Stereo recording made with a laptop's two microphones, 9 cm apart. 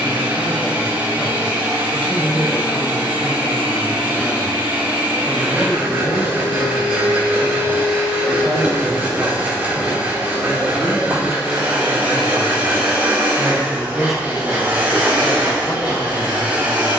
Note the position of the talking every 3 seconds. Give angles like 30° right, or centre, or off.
20° left, centre, 20° right, 30° right, 10° right, 20° left.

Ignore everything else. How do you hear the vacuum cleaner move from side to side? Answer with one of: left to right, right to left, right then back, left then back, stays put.
stays put.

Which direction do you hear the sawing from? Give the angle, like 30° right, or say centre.
10° right.